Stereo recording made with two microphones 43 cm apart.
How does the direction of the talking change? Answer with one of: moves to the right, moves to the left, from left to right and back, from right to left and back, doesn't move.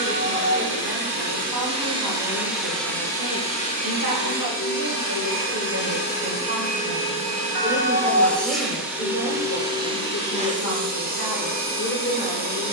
moves to the left.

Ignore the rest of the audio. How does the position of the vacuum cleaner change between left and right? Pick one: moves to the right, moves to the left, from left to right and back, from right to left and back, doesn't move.
from right to left and back.